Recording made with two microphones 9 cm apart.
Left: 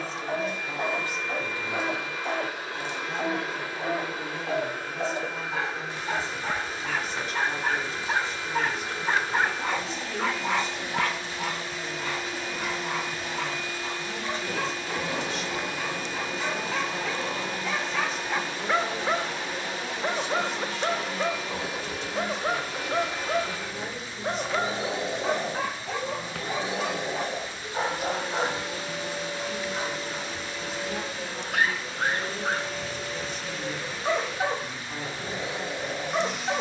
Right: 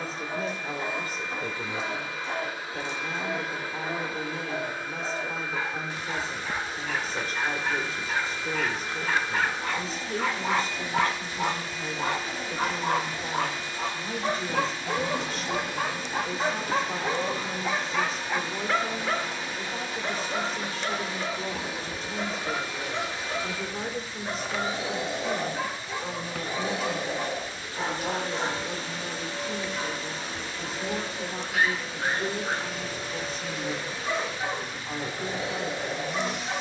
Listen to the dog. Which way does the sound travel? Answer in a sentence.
In this clip you hear the dog move from left to right and back again.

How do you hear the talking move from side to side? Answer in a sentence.
In this clip you hear the talking stay put.